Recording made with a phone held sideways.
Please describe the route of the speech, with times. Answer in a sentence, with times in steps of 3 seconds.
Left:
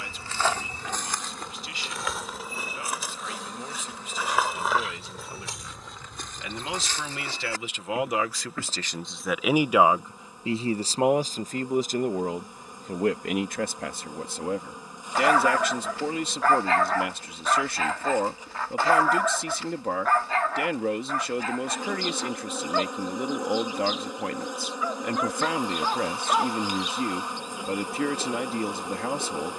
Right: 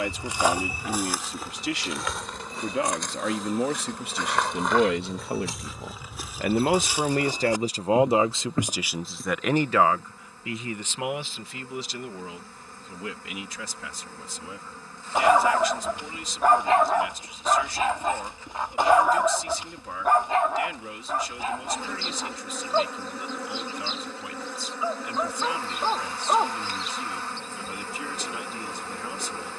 In this clip you hear the speech on the right from 0 s and on the left from 9 s.